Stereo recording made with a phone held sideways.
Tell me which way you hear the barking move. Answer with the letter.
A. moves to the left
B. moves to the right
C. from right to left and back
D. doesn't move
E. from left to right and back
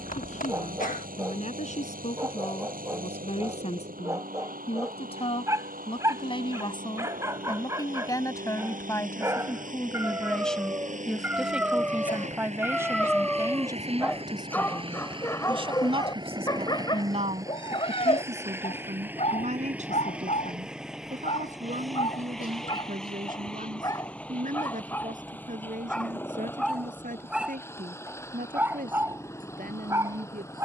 C.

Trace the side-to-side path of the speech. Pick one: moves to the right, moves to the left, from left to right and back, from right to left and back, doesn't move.
moves to the right.